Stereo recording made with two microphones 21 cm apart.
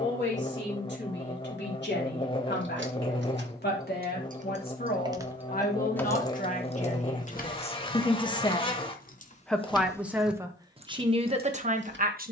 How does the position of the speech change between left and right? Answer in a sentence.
You can hear the speech move to the right.